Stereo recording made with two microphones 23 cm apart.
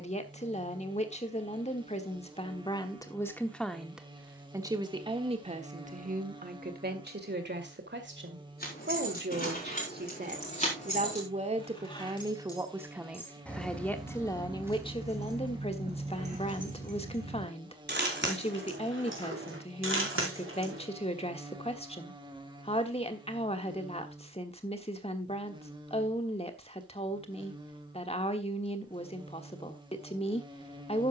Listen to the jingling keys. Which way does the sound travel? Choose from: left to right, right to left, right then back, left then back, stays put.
left to right.